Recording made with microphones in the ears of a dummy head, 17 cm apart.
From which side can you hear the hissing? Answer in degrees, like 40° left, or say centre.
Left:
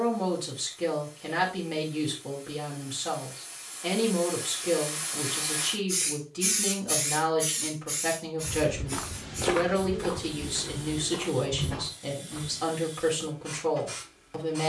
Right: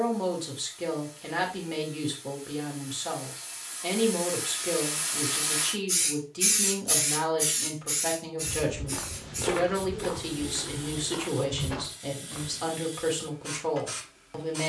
40° right.